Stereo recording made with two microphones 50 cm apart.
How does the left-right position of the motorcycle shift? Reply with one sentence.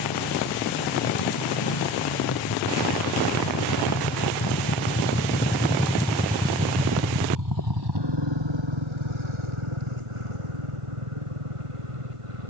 You can hear the motorcycle go from the left side to the right.